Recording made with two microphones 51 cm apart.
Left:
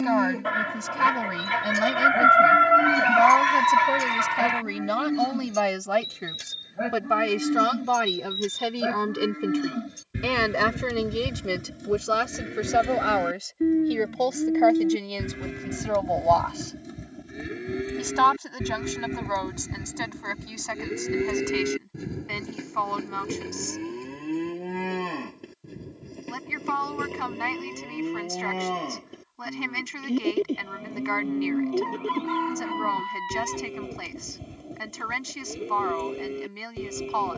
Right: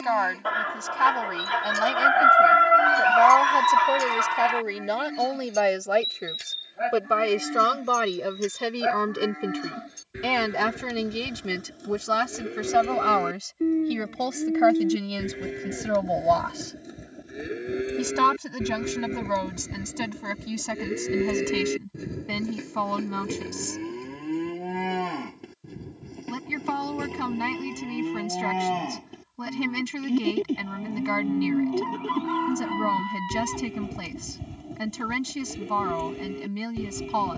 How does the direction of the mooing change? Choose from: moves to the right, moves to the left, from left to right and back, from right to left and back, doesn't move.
moves to the right.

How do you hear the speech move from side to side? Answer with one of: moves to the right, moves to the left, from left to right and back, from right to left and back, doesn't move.
moves to the right.